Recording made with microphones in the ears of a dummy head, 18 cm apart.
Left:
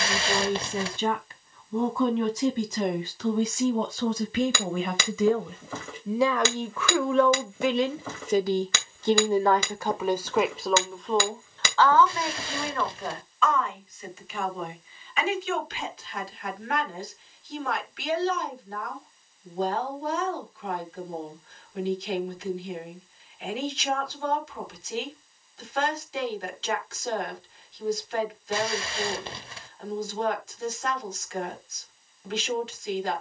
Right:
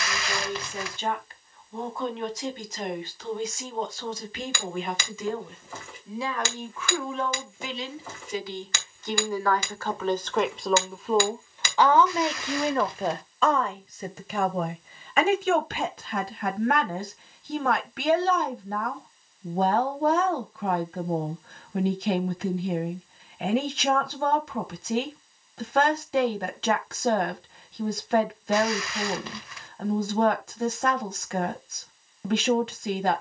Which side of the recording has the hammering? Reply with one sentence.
You can hear the hammering on the left.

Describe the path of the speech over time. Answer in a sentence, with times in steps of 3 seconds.
You can hear the speech on the left from 0 s, in the centre from 9 s and on the right from 12 s.